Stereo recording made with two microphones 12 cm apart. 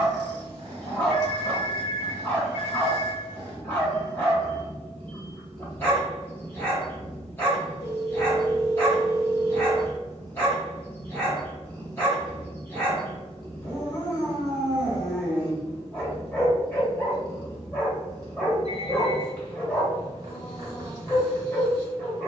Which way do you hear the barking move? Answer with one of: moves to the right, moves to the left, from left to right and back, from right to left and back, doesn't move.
doesn't move.